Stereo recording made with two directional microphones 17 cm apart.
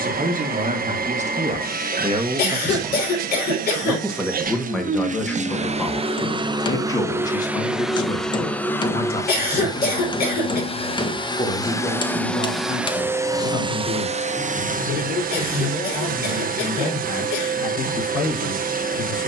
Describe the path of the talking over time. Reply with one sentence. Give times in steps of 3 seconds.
In this clip you hear the talking on the right from 0 s, in the centre from 3 s and on the left from 6 s.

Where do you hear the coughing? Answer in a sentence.
You can hear the coughing on the left.